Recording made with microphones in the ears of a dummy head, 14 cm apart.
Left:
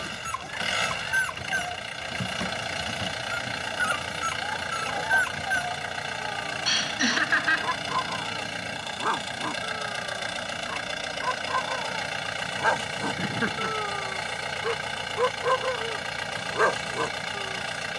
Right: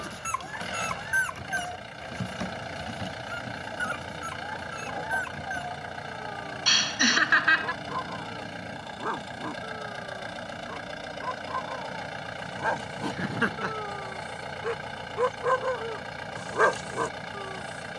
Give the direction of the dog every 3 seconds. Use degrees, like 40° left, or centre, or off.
10° left, 40° left, 50° left, 50° left, 30° left, centre.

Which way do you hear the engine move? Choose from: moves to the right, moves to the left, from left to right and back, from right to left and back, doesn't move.
doesn't move.